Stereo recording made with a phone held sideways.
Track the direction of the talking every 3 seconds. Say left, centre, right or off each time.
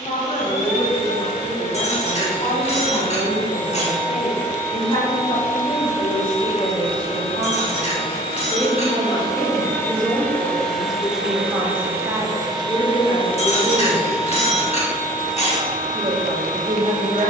left, left, left, centre, right, right.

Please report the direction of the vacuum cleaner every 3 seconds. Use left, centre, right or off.
left, left, left, centre, right, right.